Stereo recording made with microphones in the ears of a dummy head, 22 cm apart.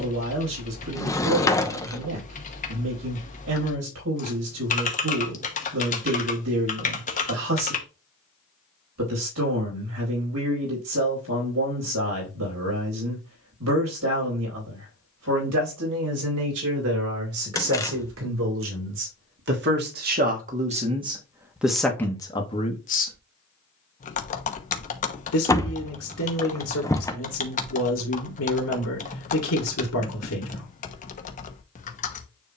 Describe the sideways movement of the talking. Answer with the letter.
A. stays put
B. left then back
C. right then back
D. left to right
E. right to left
E.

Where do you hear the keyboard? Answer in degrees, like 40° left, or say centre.
30° left.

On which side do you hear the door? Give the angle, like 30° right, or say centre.
10° left.